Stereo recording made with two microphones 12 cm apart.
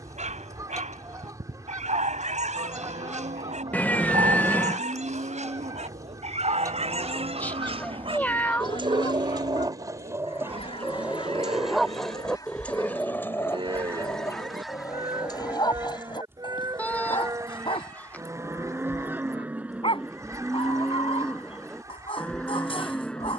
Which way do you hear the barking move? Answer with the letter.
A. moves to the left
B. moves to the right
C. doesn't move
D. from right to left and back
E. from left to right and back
A.